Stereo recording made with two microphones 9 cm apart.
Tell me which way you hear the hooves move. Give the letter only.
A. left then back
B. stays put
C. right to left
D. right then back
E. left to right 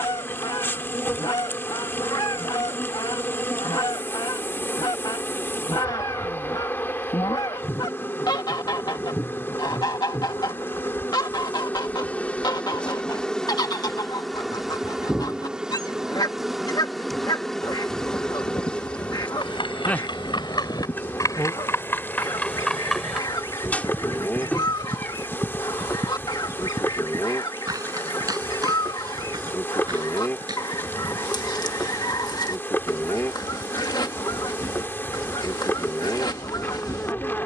E.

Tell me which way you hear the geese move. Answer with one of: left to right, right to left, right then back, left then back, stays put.
stays put.